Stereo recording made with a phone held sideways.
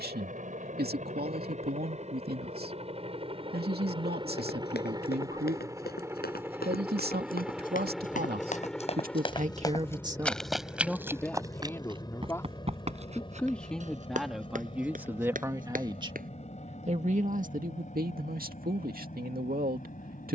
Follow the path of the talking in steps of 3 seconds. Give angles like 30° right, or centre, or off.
70° right, 70° right, 70° right, 20° right, centre, 40° right, 60° right.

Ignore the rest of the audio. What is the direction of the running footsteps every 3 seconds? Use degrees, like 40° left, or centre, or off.
off, 80° left, 60° left, centre, 40° right, 60° right, off.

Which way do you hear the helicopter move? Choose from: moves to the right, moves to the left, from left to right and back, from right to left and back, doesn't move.
moves to the left.